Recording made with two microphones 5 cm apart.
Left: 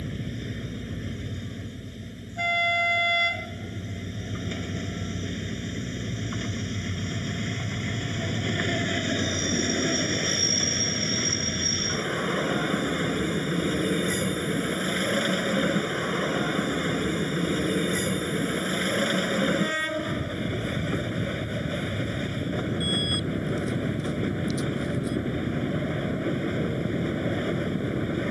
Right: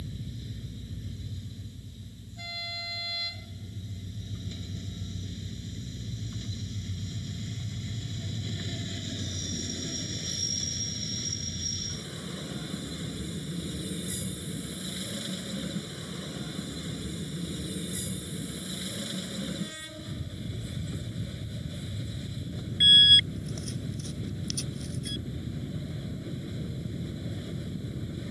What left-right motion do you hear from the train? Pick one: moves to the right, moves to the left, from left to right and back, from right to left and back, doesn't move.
doesn't move.